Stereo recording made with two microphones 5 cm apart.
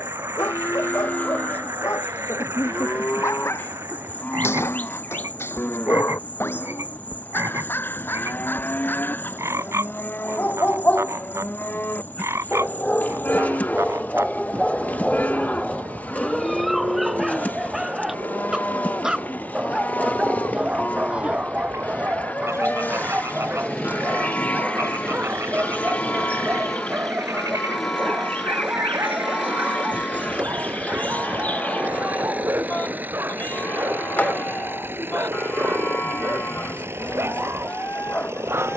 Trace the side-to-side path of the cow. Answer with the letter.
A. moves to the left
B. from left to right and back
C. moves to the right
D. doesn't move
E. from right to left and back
D.